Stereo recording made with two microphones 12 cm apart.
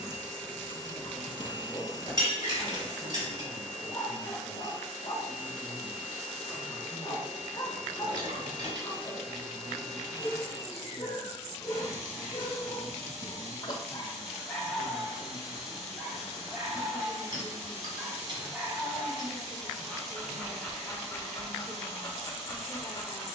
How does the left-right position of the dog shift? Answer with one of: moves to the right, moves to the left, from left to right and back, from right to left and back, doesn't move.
from left to right and back.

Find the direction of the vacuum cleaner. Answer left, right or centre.
right.